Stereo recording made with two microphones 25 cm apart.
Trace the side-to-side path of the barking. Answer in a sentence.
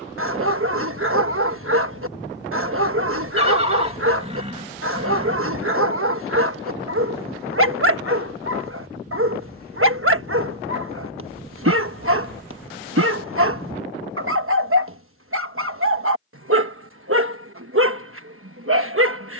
In this clip you hear the barking stay put.